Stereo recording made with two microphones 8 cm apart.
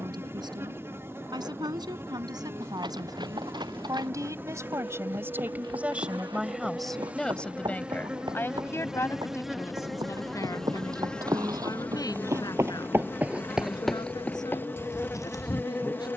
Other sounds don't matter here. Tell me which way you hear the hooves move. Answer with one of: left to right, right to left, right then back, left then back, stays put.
right to left.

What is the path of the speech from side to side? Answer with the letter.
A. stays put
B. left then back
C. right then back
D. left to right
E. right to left
E.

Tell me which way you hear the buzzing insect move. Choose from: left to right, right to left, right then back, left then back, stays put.
right to left.